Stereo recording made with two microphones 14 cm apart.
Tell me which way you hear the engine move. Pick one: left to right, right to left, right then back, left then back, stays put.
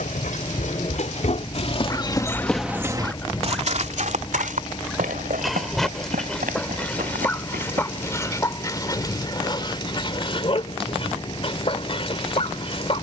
stays put.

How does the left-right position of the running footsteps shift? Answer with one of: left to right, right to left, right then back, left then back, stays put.
left to right.